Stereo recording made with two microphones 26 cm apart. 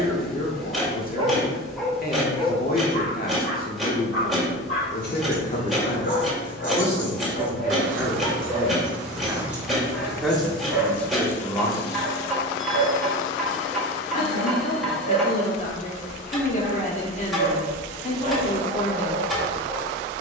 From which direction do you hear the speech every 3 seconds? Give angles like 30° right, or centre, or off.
40° left, 30° left, centre, centre, 30° left, 30° left, 30° left.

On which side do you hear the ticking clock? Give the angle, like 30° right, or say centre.
centre.